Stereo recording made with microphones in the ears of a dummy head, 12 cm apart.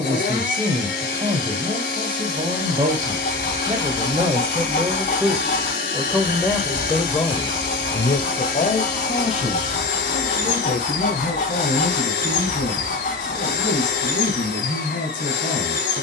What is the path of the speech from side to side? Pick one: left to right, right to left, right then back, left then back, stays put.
right to left.